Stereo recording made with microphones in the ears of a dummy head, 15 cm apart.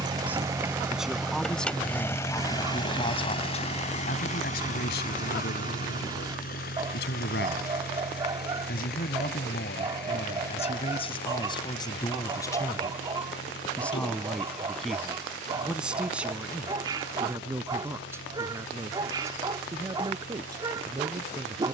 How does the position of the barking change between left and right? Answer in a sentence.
You can hear the barking stay in one place.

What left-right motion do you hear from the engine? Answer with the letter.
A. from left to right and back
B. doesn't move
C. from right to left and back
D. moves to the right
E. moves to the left
E.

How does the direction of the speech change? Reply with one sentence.
You can hear the speech go left and come back.